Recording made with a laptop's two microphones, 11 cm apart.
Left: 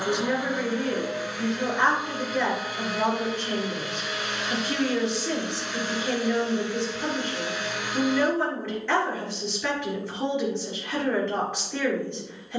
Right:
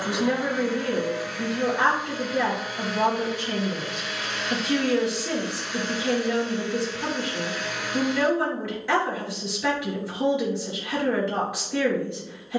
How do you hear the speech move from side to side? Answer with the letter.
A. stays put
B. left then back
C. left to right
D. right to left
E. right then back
A.